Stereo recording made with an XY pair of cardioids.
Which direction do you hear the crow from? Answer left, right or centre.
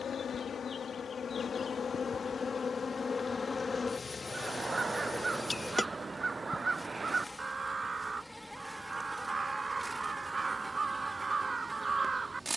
right.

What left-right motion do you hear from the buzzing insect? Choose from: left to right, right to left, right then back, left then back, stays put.
left to right.